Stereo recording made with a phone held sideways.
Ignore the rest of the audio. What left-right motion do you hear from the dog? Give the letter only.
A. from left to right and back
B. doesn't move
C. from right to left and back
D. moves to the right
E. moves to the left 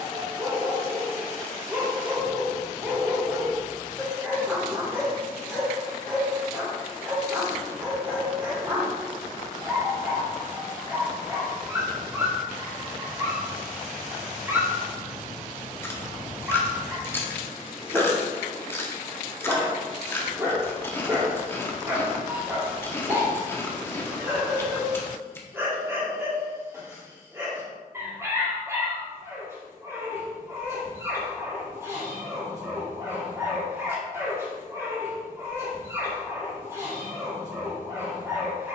B.